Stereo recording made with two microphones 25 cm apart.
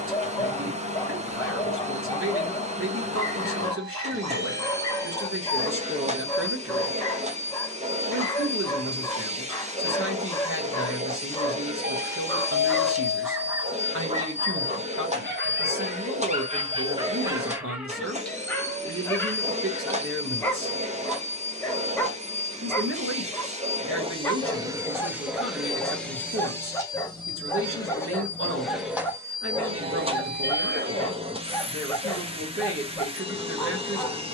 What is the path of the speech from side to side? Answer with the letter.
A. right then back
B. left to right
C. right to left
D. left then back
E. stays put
E.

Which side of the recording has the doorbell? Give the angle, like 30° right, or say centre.
40° right.